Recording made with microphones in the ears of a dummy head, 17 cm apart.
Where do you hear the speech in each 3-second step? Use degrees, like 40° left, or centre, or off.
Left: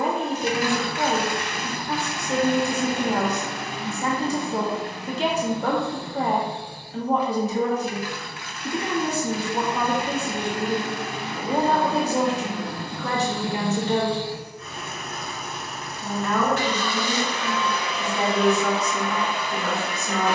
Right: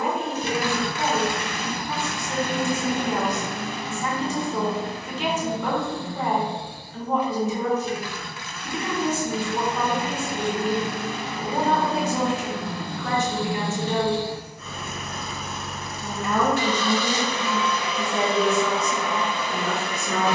30° left, 30° left, 30° left, 30° left, 30° left, 20° right, 50° right.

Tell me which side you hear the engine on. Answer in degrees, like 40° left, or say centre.
80° right.